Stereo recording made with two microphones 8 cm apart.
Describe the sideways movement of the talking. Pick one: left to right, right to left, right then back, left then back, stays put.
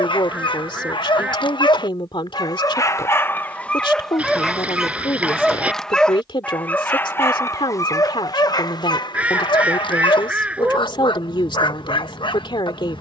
stays put.